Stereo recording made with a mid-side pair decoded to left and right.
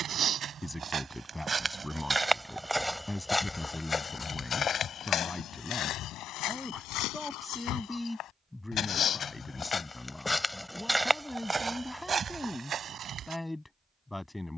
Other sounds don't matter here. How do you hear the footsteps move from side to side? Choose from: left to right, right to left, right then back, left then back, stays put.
left then back.